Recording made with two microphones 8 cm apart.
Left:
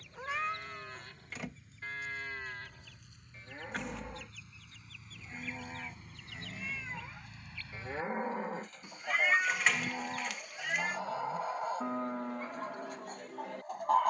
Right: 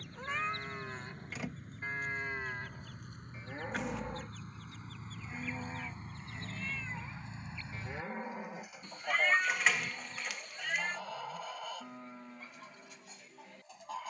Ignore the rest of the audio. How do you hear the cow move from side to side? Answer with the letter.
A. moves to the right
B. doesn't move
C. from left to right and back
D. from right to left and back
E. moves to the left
E.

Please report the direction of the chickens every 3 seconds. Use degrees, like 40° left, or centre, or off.
50° right, 40° right, 20° right, 20° left, 50° left.